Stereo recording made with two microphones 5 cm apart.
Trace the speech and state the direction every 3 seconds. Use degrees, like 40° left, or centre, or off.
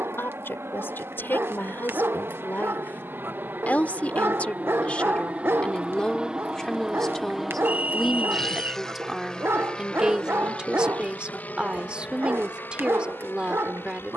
50° left, 30° left, 10° left, 20° right, 20° right.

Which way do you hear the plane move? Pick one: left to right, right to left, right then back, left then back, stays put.
right to left.